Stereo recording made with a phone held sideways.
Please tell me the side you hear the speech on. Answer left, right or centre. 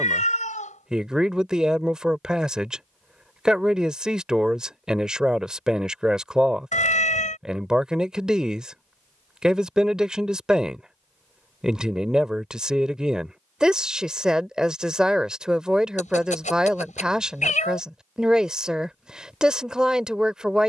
centre.